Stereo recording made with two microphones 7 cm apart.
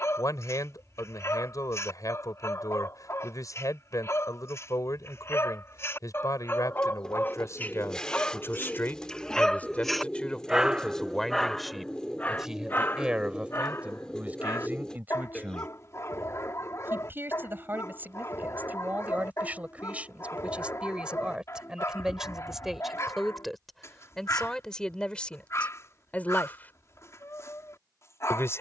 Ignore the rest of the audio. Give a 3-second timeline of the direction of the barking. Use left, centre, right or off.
left, left, left, centre, left, left, left, left, left, left.